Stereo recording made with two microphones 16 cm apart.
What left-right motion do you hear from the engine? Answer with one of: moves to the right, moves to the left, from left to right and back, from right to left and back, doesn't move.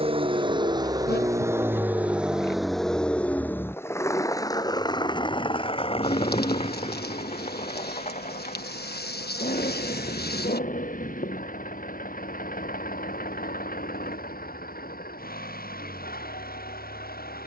moves to the left.